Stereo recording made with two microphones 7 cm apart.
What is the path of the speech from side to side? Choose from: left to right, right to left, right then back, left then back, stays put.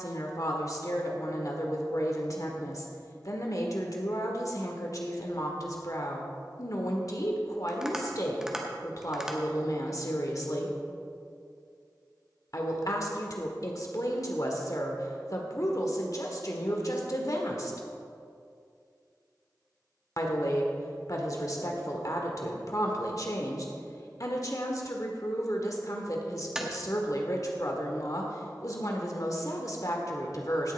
stays put.